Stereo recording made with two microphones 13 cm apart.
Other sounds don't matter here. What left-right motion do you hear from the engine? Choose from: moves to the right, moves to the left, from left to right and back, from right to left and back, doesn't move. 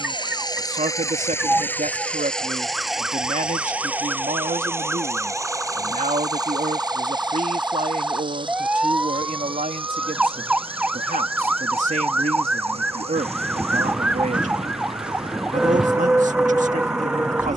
moves to the right.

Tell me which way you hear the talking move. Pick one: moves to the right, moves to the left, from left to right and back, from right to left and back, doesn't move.
doesn't move.